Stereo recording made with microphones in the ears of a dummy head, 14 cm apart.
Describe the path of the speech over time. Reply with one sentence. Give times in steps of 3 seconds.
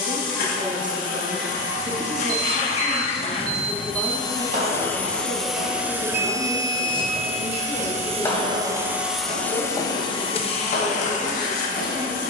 In this clip you hear the speech on the right from 0 s, in the centre from 3 s and on the left from 6 s.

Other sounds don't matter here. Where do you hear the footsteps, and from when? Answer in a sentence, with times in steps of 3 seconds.
In this clip you hear the footsteps not at all from 0 s, on the right from 3 s, in the centre from 6 s and on the left from 9 s.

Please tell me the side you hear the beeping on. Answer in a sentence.
You can hear the beeping on the right.